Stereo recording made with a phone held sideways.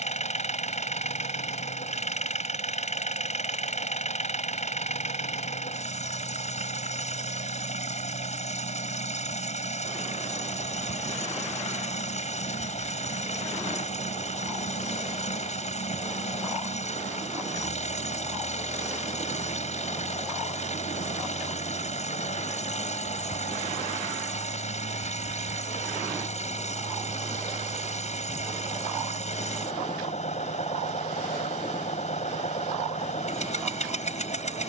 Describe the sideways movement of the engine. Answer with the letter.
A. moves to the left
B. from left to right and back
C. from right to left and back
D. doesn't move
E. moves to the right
D.